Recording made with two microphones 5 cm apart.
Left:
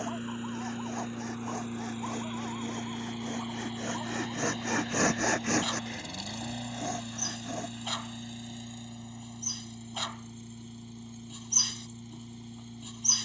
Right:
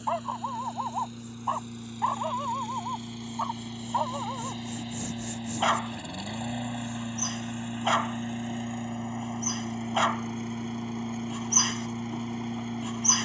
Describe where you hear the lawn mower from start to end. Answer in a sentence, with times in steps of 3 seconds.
In this clip you hear the lawn mower on the left from 0 s, in the centre from 3 s and on the right from 6 s.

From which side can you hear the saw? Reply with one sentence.
You can hear the saw on the left.